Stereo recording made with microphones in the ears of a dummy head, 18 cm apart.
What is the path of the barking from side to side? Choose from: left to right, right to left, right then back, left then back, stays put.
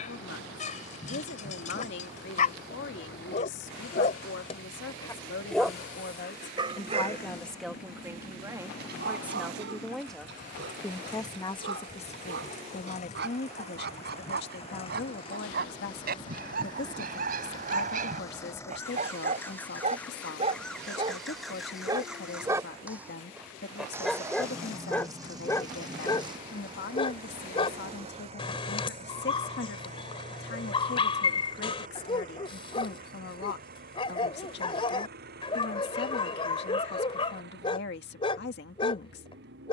right then back.